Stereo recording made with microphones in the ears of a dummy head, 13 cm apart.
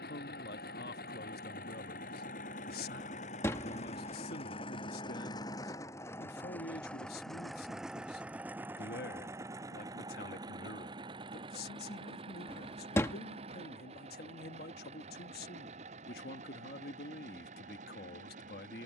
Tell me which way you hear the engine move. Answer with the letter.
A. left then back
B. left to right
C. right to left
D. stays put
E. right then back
B.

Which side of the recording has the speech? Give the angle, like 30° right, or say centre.
80° left.